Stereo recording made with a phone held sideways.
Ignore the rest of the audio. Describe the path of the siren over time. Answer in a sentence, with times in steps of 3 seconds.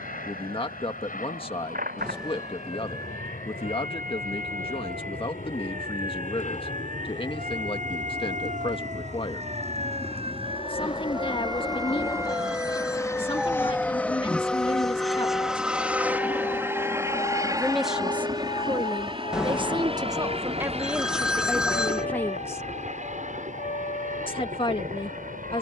In this clip you hear the siren on the right from 0 s, in the centre from 12 s and on the left from 15 s.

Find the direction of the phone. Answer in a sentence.
You can hear the phone in the centre.